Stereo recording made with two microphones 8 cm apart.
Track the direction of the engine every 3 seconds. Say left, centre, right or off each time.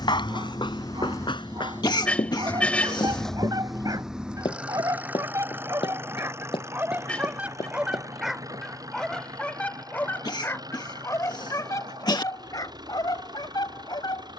left, centre, right, right, right.